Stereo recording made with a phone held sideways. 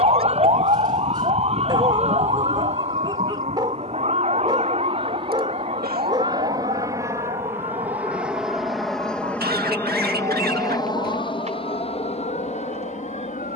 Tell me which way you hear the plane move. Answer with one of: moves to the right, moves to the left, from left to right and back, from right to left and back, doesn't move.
moves to the left.